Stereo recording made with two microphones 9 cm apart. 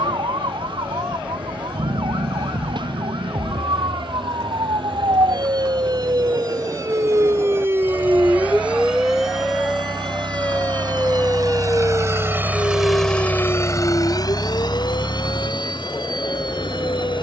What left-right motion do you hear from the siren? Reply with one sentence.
In this clip you hear the siren go from the right side to the left.